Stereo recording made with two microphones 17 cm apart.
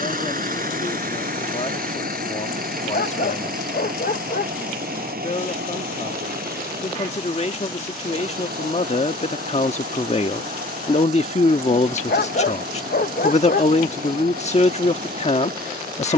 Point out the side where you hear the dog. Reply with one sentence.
You can hear the dog on the left.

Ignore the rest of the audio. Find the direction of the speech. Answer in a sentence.
You can hear the speech on the left.